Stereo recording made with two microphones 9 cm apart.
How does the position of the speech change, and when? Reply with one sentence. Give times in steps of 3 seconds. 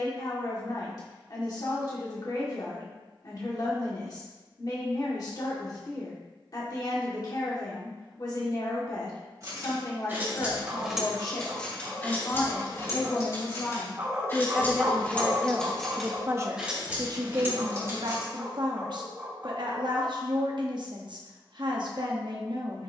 You can hear the speech on the left from 0 s and on the right from 15 s.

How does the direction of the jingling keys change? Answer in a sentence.
You can hear the jingling keys move from right to left and back again.